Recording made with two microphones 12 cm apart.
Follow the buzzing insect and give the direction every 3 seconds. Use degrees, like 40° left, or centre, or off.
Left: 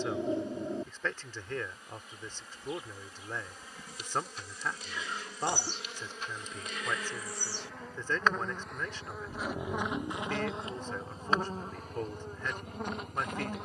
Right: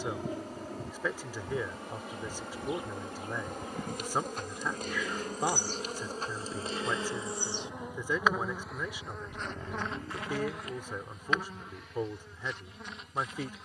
60° right, 50° right, 20° right, 20° left, 40° left.